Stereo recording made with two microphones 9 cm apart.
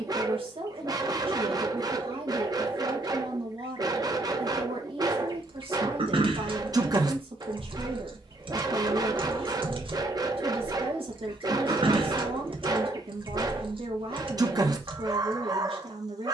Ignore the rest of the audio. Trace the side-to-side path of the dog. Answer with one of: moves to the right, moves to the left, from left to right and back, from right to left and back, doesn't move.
doesn't move.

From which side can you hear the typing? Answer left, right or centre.
right.